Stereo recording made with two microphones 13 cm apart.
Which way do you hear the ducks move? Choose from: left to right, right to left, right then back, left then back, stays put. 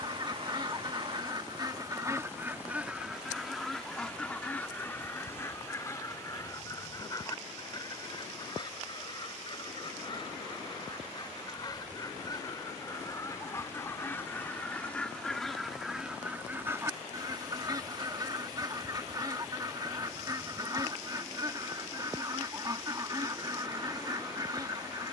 left then back.